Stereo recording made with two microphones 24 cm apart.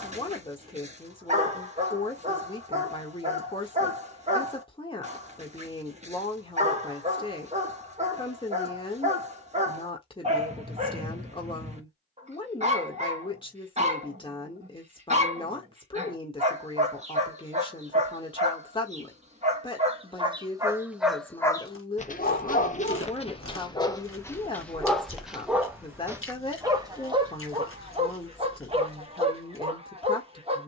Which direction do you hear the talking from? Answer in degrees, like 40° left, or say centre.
20° left.